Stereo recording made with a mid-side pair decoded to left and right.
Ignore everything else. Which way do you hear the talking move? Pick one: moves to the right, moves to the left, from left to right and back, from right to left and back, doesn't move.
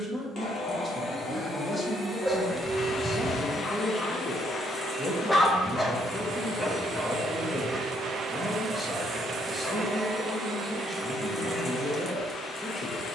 doesn't move.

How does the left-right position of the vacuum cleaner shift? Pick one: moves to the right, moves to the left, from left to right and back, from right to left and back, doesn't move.
from left to right and back.